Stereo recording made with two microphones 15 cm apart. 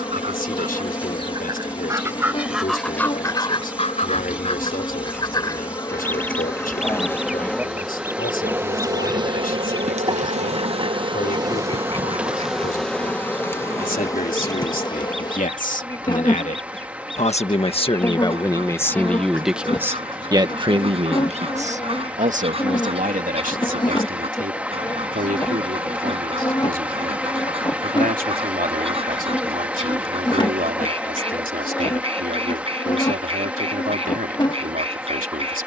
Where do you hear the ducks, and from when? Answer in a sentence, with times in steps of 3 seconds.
In this clip you hear the ducks on the right from 0 s, on the left from 3 s, in the centre from 6 s and on the right from 9 s.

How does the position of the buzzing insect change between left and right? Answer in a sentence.
In this clip you hear the buzzing insect go right and come back.